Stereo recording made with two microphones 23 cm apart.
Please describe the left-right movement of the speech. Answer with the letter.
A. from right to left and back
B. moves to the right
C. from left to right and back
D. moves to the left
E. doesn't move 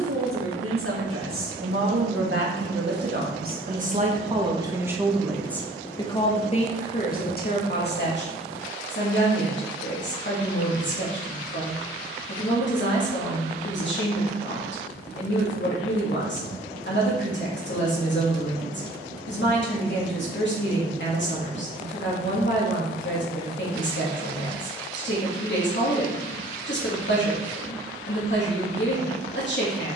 D.